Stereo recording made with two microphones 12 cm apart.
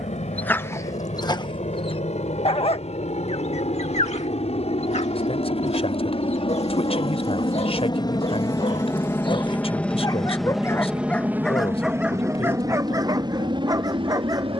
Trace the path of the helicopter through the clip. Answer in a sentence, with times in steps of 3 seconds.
In this clip you hear the helicopter on the left from 0 s, in the centre from 9 s and on the right from 12 s.